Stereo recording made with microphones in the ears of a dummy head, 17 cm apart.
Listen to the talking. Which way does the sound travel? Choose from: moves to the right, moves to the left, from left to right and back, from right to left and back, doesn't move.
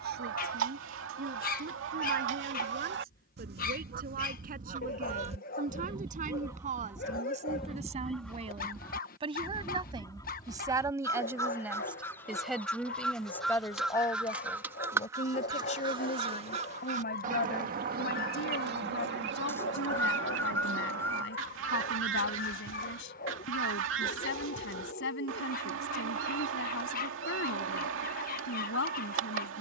moves to the left.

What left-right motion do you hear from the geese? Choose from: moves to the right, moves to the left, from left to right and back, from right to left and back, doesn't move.
from right to left and back.